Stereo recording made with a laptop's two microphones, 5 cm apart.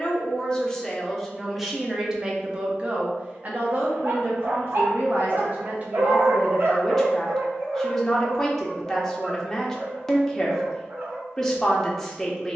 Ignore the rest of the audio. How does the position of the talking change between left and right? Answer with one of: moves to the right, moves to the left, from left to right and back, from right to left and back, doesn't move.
from left to right and back.